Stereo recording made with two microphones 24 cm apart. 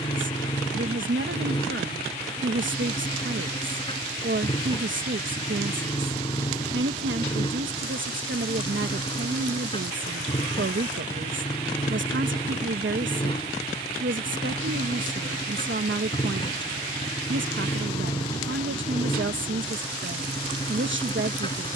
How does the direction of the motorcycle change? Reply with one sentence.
You can hear the motorcycle stay put.